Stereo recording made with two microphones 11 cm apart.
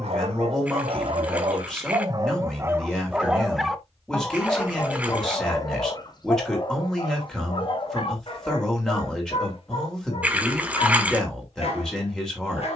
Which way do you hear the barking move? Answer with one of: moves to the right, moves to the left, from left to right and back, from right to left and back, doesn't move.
moves to the left.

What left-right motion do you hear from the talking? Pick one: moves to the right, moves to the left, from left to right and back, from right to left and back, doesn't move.
doesn't move.